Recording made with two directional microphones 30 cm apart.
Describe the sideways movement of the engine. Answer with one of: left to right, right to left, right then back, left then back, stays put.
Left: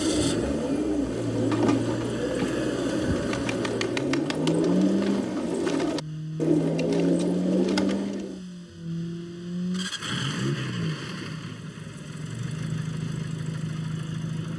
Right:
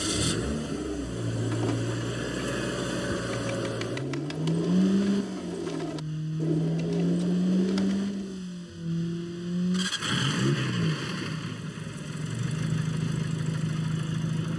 stays put.